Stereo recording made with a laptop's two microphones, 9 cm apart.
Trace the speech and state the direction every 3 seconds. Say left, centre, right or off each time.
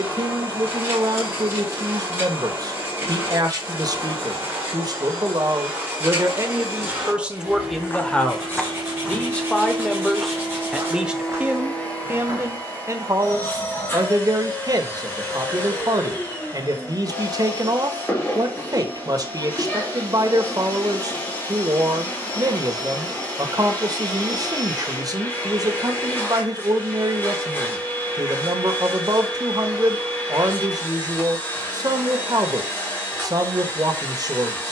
right, right, centre, centre, right, right, right, right, right, right, right, right.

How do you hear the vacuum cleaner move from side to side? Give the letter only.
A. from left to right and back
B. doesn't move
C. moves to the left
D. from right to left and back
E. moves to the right
C.